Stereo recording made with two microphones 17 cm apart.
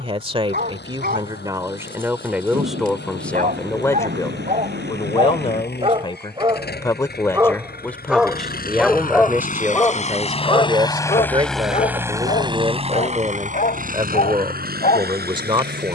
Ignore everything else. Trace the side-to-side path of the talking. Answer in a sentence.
In this clip you hear the talking go left and come back.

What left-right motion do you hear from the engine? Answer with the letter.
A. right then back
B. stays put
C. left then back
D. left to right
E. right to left
D.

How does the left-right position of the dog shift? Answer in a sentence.
You can hear the dog move from right to left.